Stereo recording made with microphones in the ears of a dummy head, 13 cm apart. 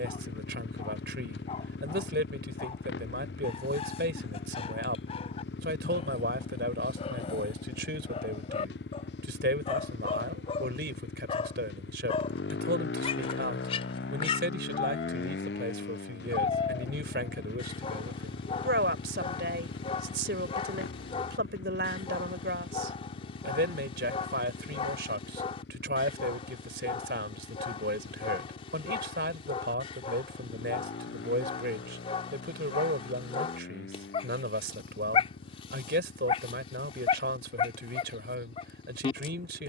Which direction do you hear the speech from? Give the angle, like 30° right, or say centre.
80° right.